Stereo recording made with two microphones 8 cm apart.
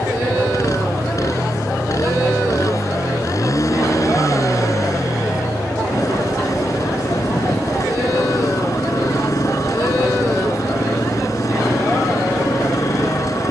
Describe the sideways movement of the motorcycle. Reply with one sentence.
In this clip you hear the motorcycle stay in one place.